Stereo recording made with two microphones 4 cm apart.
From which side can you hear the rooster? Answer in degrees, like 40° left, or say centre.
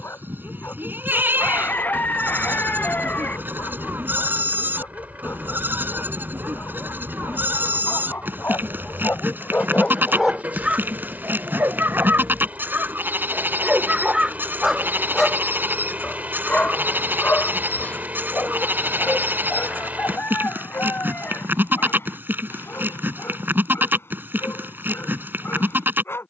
40° left.